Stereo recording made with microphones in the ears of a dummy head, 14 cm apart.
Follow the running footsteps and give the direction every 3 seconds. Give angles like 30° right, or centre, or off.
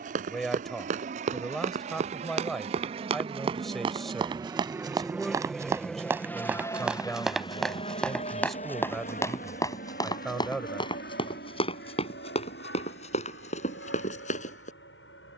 50° right, 30° right, centre, 30° left, 50° left.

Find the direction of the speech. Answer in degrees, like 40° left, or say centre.
centre.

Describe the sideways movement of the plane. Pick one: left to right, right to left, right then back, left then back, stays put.
right to left.